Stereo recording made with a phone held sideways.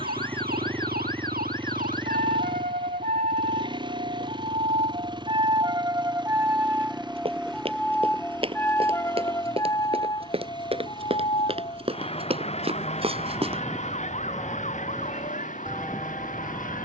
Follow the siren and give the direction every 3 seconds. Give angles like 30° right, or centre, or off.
70° right, 40° right, centre, 30° left, 40° left, 50° left.